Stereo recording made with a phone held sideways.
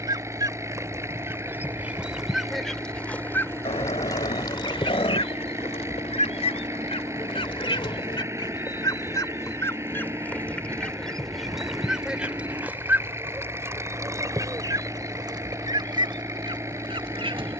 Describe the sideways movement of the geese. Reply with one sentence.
In this clip you hear the geese go left and come back.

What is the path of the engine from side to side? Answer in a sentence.
You can hear the engine stay in one place.